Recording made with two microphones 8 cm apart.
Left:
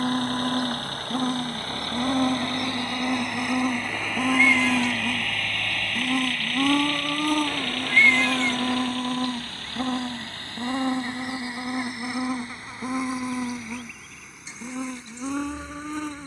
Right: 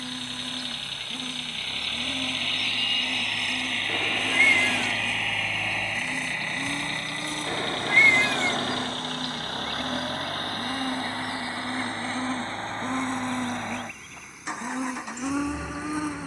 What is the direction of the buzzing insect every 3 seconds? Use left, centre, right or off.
left, left, left, left, centre, centre.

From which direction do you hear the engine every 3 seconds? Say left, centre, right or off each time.
left, centre, right, right, right, right.